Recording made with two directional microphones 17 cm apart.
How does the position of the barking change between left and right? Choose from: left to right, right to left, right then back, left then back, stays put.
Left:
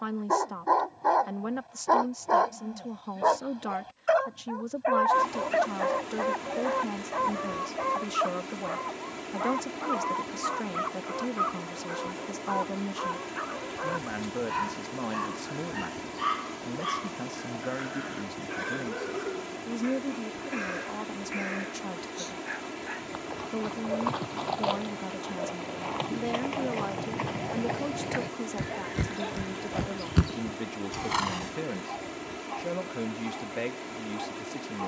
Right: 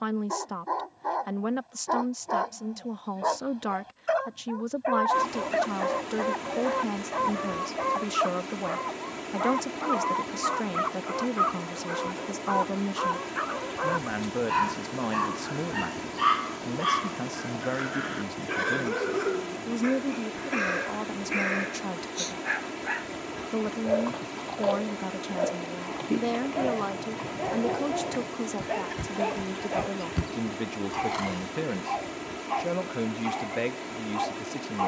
left to right.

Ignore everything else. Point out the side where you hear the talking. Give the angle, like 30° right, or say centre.
20° right.